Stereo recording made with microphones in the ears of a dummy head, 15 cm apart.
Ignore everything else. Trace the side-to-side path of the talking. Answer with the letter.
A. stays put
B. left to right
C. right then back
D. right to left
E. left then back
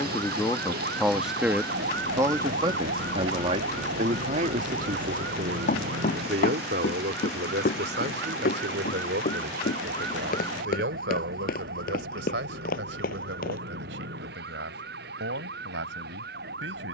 B.